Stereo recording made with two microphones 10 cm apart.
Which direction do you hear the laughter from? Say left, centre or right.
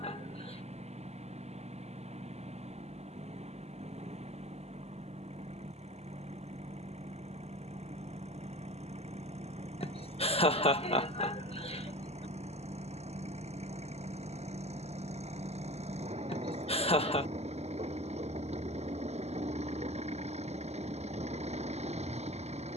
left.